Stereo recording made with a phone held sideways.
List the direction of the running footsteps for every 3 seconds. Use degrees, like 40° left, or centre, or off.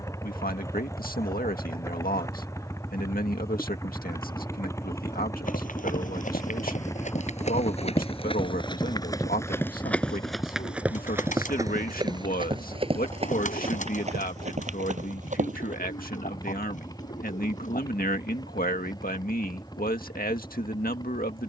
off, 60° left, 50° left, centre, 40° right, 50° right, off.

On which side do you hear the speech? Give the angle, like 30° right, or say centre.
70° left.